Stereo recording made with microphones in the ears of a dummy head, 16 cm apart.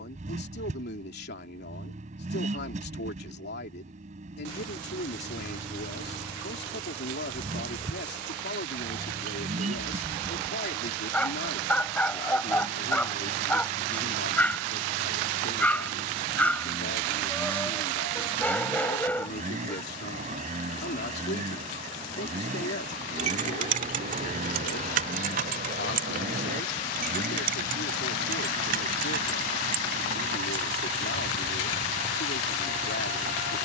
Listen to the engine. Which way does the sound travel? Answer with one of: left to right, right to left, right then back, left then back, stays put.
stays put.